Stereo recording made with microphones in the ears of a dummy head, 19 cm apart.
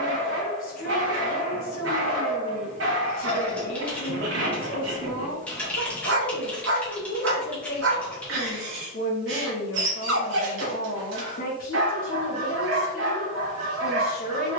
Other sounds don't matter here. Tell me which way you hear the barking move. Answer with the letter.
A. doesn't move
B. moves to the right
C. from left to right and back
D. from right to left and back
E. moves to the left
A.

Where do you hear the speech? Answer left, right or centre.
left.